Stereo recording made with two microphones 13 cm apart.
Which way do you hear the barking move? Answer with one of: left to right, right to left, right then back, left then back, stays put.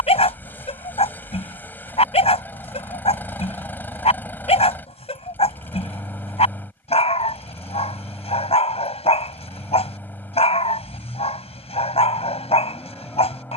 stays put.